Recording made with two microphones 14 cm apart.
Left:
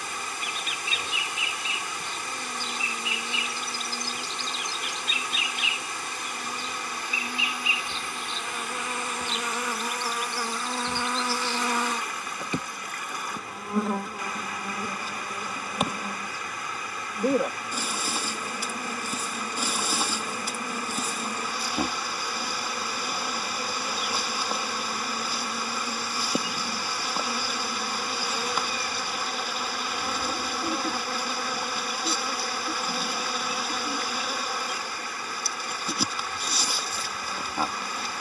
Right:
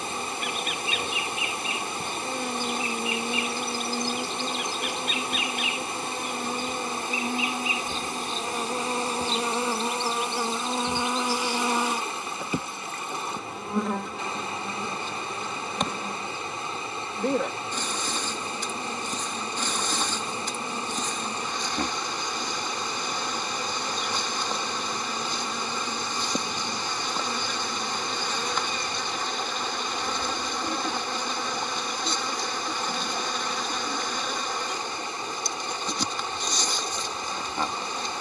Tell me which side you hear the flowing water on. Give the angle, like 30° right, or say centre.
30° right.